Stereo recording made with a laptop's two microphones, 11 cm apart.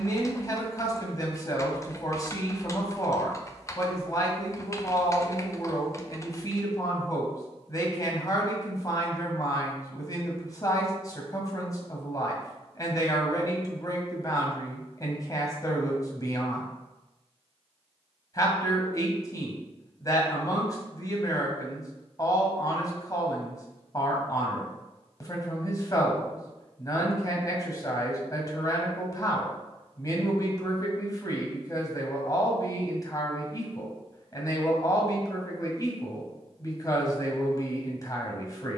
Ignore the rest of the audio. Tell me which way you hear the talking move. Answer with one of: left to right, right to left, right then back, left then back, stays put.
stays put.